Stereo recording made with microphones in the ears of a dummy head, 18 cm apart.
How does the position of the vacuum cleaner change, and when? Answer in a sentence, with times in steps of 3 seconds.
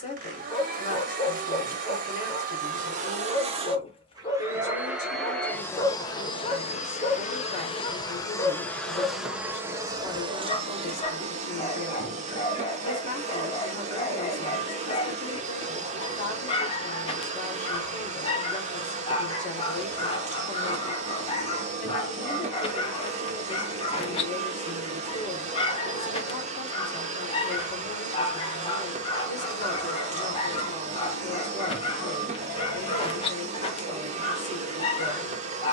You can hear the vacuum cleaner on the right from 0 s, in the centre from 3 s, on the left from 6 s and on the right from 9 s.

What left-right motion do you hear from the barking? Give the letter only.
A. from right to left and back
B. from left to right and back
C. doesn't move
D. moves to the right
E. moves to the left
C.